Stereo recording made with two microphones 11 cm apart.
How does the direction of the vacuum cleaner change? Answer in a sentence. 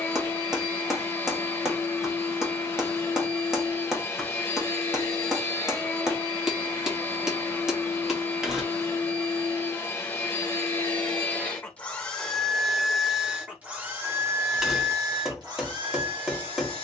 In this clip you hear the vacuum cleaner move to the right.